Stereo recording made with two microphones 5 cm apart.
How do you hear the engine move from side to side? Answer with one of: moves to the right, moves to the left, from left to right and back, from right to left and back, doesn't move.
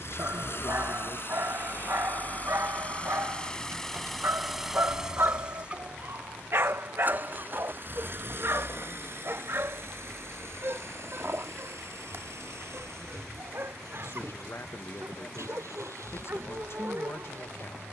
moves to the right.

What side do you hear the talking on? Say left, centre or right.
left.